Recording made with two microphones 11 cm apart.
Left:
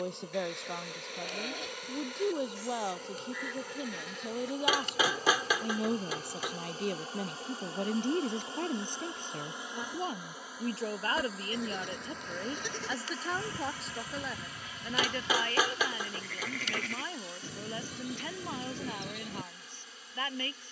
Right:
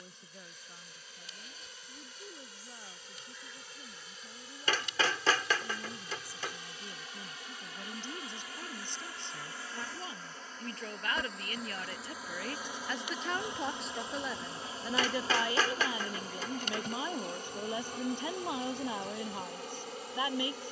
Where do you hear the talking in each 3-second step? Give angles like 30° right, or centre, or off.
70° left, 70° left, 60° left, 30° left, centre, 10° right, 20° right.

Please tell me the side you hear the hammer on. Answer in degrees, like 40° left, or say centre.
10° left.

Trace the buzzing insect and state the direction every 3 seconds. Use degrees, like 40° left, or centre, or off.
50° left, 50° left, 30° left, 10° left, 20° right, 40° right, 60° right.